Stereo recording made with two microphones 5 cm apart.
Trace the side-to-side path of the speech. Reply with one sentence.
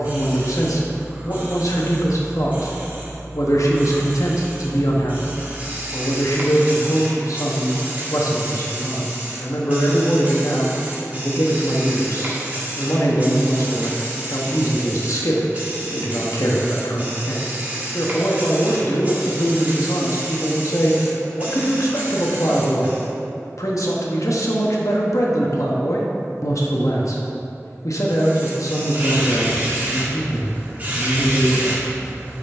In this clip you hear the speech stay in one place.